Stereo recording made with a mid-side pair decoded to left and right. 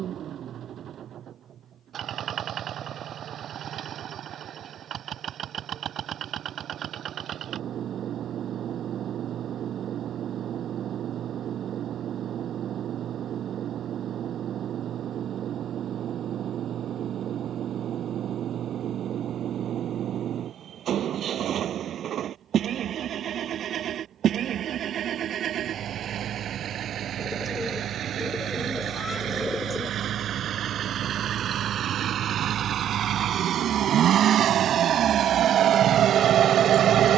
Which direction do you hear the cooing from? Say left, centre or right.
centre.